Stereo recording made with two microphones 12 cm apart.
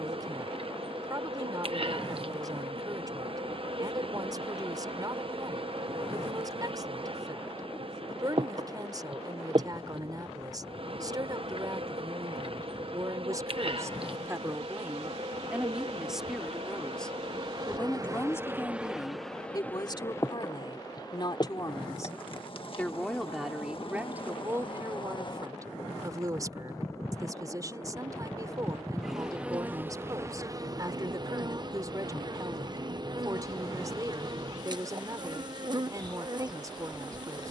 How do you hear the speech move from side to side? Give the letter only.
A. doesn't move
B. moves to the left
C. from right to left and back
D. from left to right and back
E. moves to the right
C.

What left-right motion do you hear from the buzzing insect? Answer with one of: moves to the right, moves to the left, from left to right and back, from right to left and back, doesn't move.
from right to left and back.